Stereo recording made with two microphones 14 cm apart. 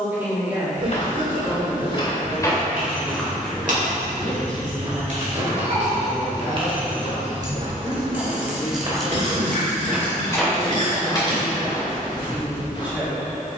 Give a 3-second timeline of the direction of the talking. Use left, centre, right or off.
centre, centre, left, centre, centre.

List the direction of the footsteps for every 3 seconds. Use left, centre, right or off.
left, right, right, centre, left.